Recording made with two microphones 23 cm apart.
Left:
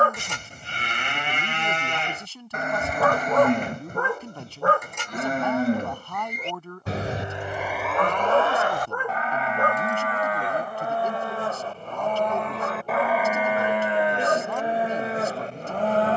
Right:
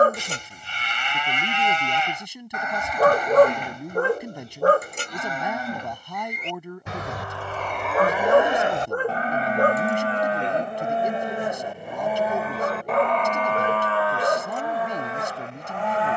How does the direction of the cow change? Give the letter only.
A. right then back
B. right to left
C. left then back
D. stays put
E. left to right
A.